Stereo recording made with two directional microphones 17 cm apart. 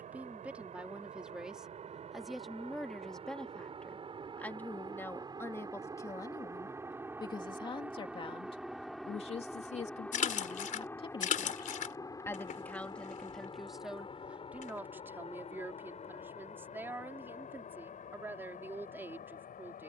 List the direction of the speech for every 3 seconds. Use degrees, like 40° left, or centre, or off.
centre, 10° left, 30° left, 30° left, centre, 10° right, 10° right.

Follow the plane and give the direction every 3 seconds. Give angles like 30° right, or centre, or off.
40° right, 30° right, 10° right, 10° left, 30° left, 40° left, 50° left.